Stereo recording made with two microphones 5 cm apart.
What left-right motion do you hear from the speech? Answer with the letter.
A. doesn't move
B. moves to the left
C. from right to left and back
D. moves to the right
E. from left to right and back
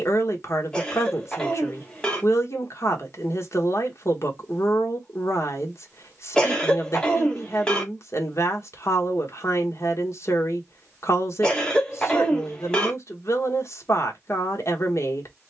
A.